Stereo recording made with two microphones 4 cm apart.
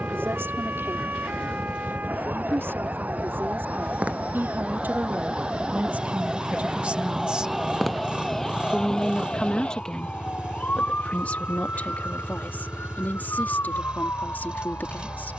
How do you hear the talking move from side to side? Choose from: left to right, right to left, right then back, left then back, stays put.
right to left.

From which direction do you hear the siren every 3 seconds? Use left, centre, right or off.
right, right, centre, left, left.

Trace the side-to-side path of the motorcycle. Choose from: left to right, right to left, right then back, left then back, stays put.
stays put.